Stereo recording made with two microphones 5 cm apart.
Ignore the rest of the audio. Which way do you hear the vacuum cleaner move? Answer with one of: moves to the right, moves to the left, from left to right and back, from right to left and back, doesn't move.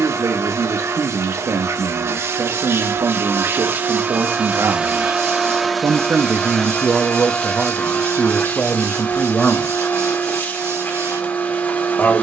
moves to the left.